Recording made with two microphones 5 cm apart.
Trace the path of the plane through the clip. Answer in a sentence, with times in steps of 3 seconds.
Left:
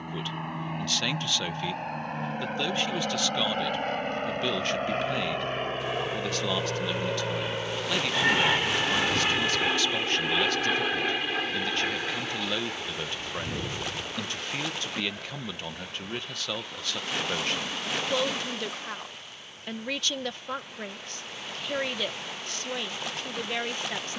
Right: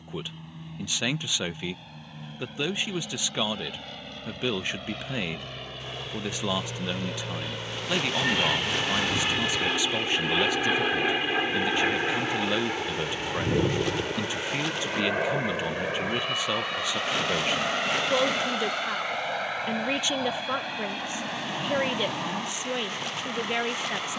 You can hear the plane on the left from 0 s, in the centre from 9 s and on the right from 12 s.